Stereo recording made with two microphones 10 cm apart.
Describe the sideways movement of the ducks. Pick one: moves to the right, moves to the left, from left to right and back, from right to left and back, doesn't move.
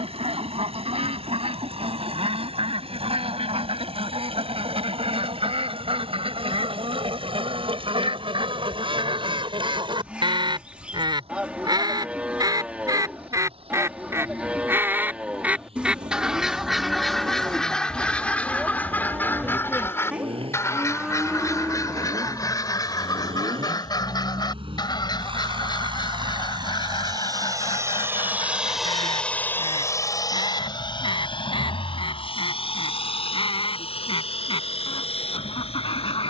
moves to the left.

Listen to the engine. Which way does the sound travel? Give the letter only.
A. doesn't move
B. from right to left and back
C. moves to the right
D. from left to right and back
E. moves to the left
E.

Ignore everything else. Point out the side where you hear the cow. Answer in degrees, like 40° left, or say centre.
10° right.